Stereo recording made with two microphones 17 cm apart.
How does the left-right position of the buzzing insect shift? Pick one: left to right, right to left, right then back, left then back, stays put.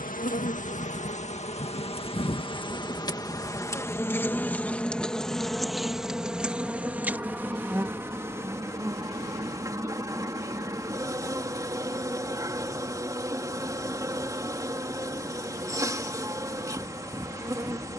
left to right.